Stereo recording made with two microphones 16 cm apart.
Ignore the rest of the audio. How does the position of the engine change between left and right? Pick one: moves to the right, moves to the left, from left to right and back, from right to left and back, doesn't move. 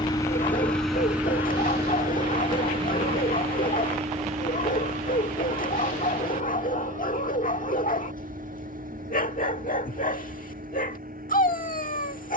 moves to the right.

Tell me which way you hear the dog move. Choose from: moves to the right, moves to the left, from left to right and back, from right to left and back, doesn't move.
doesn't move.